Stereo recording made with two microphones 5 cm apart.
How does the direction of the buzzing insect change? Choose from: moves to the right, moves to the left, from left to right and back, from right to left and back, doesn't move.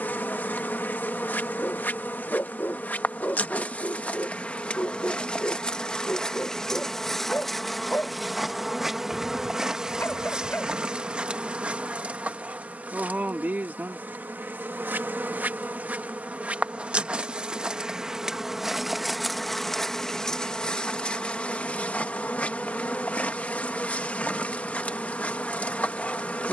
from left to right and back.